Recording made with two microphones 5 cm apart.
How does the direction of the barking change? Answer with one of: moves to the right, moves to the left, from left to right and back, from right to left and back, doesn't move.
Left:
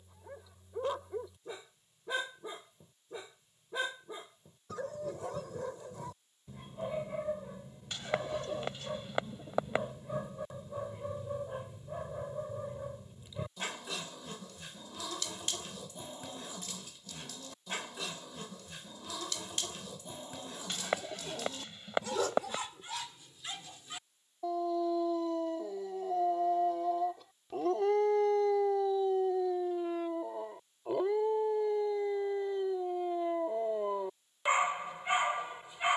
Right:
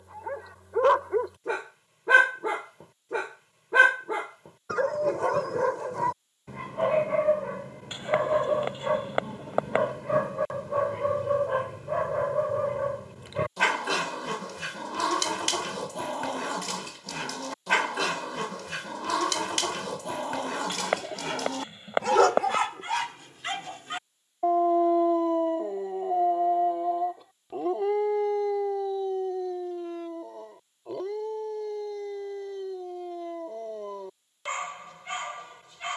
moves to the left.